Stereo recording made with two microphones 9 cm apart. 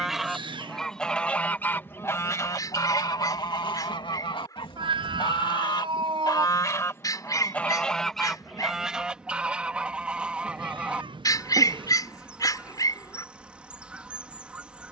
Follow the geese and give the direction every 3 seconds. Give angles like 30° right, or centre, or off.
20° left, 60° left, 20° left, 10° right, 10° right.